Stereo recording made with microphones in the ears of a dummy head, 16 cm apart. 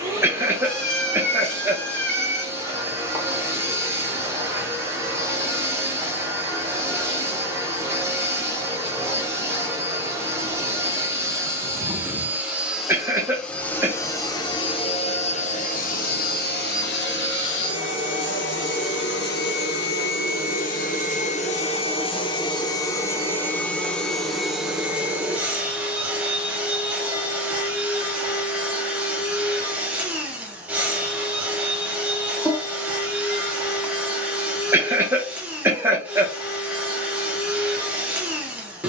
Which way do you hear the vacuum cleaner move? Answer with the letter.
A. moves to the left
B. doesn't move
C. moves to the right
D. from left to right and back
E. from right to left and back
E.